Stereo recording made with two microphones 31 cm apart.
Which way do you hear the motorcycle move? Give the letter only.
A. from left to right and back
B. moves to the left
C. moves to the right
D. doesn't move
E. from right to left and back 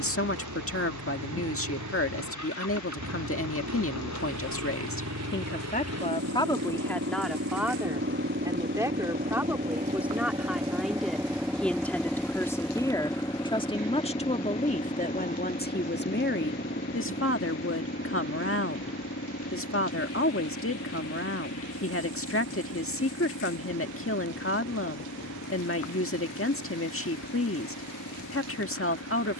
B.